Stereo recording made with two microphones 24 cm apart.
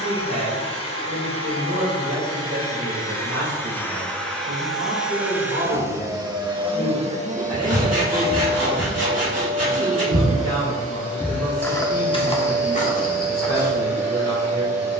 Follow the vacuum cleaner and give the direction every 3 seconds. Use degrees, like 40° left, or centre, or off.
20° left, centre, 30° right, 60° right, 80° right.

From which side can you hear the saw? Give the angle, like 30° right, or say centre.
80° right.